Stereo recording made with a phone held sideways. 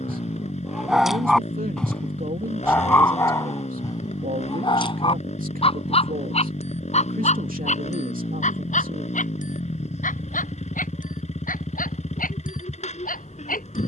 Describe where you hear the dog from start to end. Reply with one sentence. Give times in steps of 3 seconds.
In this clip you hear the dog in the centre from 0 s and on the left from 3 s.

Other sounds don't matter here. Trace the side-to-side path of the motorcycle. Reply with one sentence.
You can hear the motorcycle stay in one place.